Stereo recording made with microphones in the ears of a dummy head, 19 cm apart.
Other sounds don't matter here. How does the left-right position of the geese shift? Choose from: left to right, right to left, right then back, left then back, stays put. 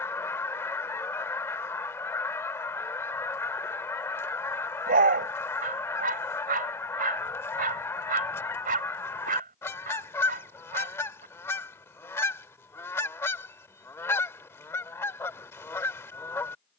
stays put.